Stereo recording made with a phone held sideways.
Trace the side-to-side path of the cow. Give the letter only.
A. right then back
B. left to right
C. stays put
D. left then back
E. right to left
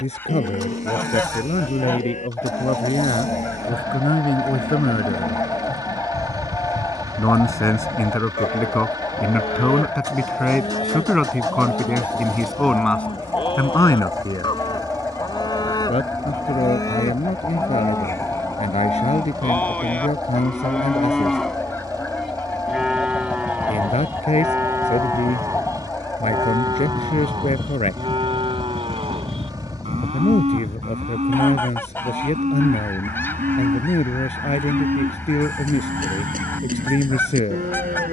B.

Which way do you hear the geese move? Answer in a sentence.
You can hear the geese stay put.